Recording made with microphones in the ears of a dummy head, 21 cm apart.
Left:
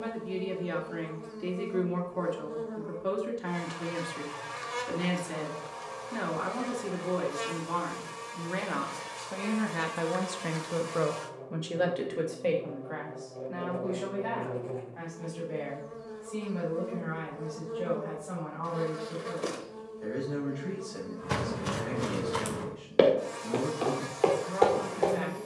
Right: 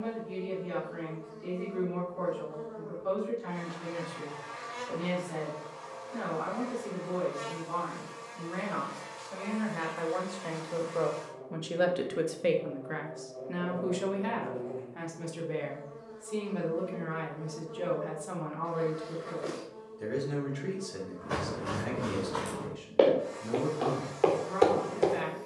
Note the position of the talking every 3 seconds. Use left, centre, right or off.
left, left, left, left, right, right, right, right, right.